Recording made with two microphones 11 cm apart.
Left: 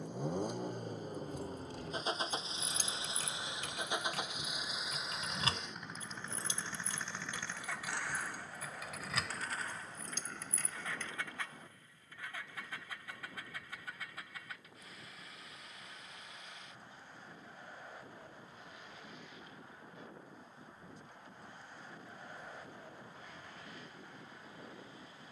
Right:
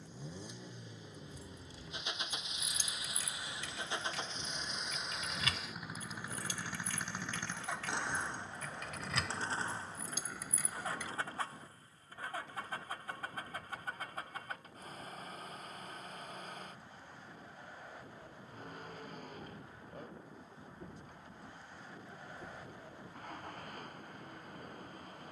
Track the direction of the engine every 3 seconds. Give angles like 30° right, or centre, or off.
40° left, 10° left, 20° right, 30° right, 40° right, 40° right, 50° right, 50° right, 50° right.